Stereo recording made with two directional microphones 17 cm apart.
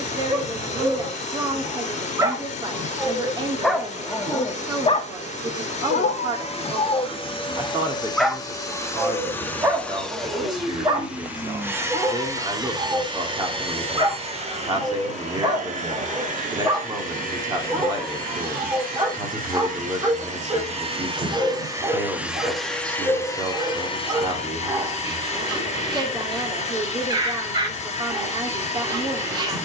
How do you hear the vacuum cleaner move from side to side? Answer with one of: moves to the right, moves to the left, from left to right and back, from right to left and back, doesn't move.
from left to right and back.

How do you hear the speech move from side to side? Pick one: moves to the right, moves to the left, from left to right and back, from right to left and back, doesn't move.
doesn't move.